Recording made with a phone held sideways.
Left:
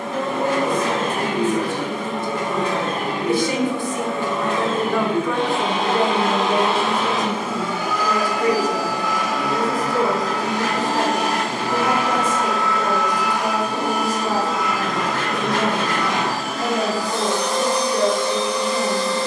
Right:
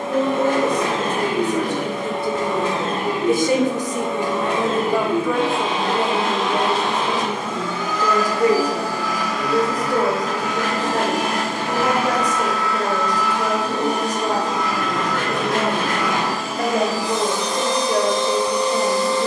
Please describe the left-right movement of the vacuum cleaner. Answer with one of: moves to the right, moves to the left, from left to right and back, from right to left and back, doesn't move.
from right to left and back.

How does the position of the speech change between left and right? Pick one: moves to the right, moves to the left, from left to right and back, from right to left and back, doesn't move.
from right to left and back.